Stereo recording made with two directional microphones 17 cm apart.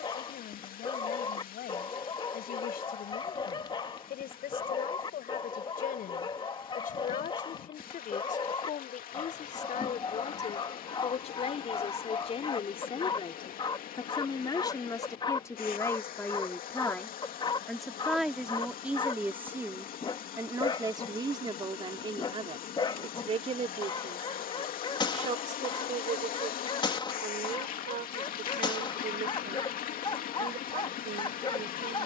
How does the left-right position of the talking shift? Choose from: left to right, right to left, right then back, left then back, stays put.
left to right.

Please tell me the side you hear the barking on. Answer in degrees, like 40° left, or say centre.
30° left.